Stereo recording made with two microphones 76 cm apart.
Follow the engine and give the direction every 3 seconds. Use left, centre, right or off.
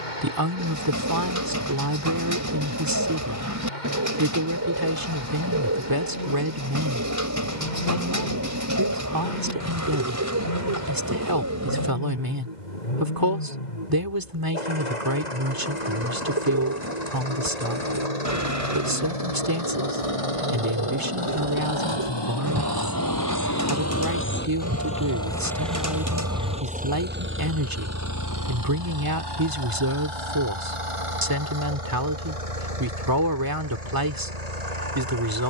left, left, left, left, left, left, left, left, centre, right, right, right.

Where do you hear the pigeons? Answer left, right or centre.
right.